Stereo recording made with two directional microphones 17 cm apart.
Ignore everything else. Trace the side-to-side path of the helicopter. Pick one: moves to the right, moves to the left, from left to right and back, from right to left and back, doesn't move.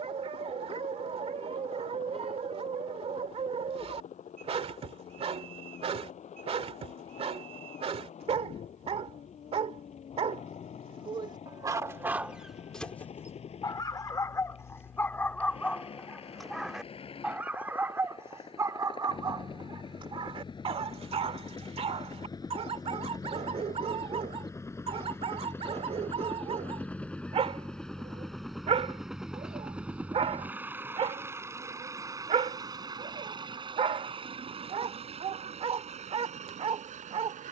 moves to the right.